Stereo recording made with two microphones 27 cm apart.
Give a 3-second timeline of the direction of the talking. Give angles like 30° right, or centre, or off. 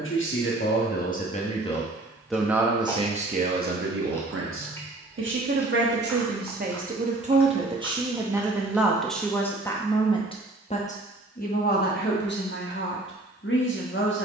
20° left, 40° right, 20° right, 20° left, 40° left.